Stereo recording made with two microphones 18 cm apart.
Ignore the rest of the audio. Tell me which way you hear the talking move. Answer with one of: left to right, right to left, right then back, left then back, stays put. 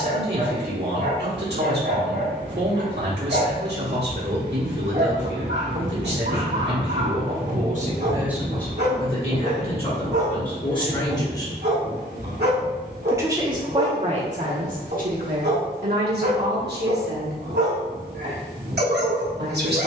left then back.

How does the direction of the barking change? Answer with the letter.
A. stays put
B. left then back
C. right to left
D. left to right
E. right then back
A.